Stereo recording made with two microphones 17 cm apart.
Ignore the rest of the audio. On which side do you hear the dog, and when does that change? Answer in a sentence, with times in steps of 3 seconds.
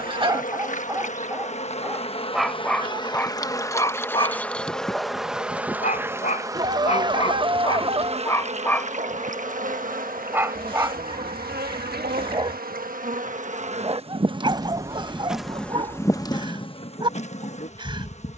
You can hear the dog in the centre from 0 s, on the left from 3 s, in the centre from 9 s and on the right from 12 s.